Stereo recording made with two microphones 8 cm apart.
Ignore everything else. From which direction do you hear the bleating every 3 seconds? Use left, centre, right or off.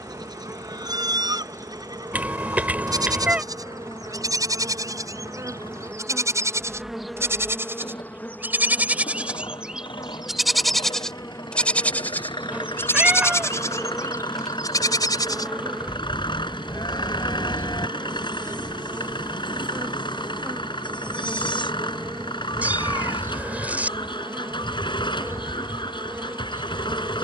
right, right, right, centre, left, left, left, left, left.